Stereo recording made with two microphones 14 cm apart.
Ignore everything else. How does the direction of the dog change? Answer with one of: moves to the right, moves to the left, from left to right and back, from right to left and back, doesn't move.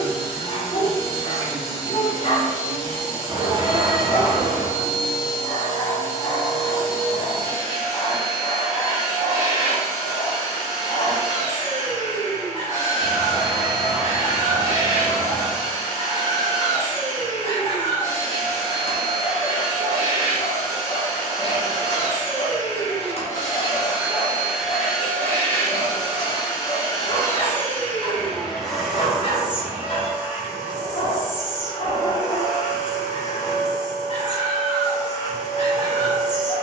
doesn't move.